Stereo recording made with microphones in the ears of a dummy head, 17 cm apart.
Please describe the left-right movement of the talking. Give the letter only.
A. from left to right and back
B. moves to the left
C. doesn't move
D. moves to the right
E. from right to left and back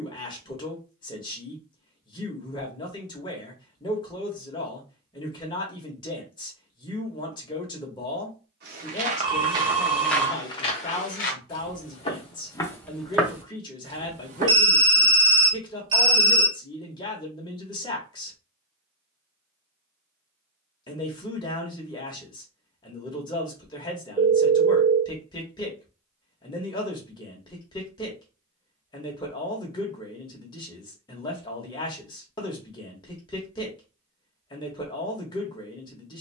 C.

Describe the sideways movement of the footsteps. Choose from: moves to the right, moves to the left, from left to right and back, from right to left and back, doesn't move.
from right to left and back.